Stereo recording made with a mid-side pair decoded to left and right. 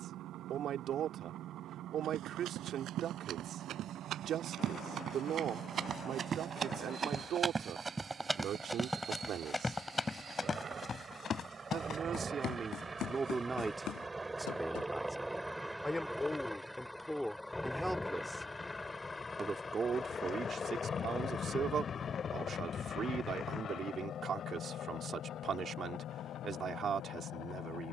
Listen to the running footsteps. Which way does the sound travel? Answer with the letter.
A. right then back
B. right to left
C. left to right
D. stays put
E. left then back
B.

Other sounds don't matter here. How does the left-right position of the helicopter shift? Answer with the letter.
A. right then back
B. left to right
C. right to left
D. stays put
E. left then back
C.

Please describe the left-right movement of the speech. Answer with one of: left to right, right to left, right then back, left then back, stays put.
left then back.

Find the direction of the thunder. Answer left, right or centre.
left.